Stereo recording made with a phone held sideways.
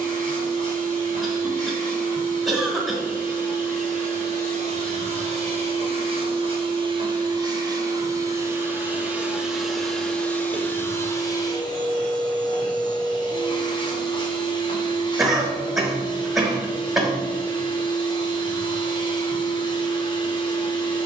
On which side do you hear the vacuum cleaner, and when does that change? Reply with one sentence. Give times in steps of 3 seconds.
In this clip you hear the vacuum cleaner on the right from 0 s, in the centre from 9 s and on the left from 12 s.